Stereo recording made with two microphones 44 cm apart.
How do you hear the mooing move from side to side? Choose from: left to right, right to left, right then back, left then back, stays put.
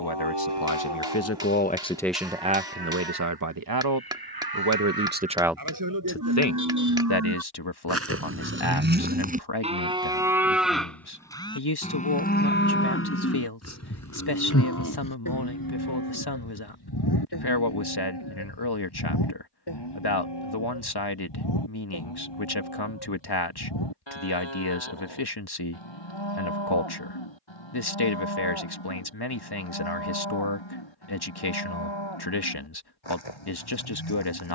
right to left.